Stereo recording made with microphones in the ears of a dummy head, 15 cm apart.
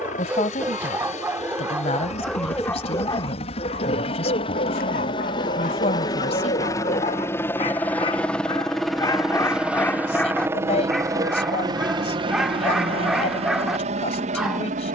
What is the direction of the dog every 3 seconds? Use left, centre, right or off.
centre, left, left, centre, centre.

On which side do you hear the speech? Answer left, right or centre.
left.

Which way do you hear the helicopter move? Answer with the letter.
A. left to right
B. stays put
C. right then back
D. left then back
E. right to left
A.